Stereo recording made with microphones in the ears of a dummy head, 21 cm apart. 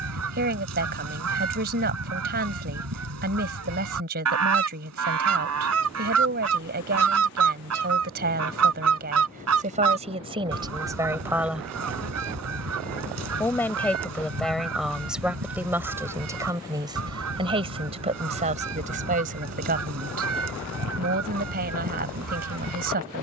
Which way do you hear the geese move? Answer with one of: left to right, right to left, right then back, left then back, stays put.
stays put.